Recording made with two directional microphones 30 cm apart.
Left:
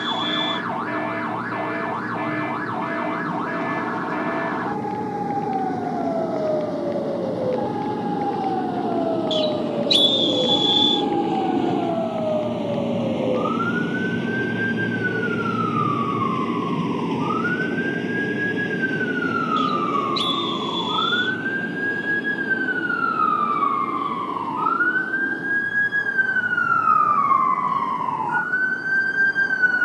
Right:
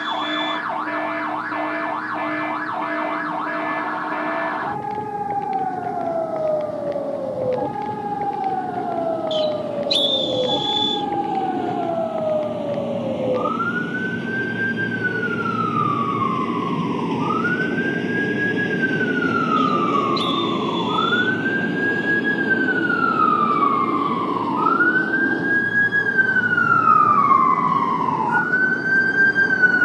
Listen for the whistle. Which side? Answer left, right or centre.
left.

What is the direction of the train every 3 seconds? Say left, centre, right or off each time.
left, left, left, left, left, centre, right, right, right, right.